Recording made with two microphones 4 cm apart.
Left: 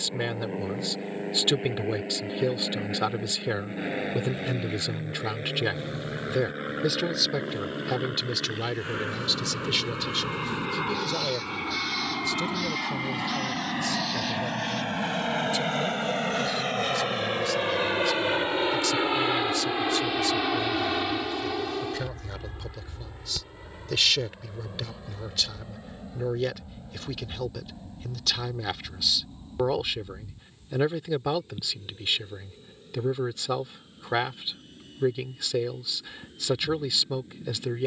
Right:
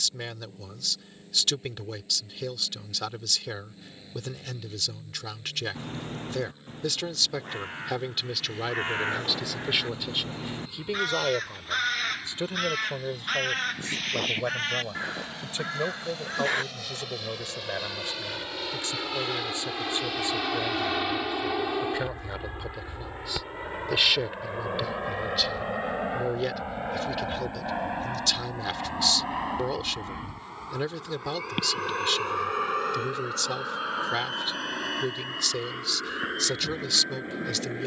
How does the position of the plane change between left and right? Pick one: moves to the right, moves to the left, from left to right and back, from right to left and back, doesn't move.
moves to the right.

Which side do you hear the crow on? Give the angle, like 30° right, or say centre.
50° right.